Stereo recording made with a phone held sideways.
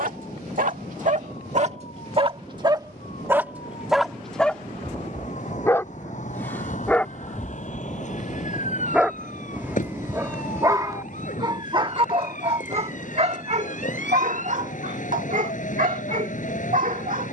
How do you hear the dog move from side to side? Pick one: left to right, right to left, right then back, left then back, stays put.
left then back.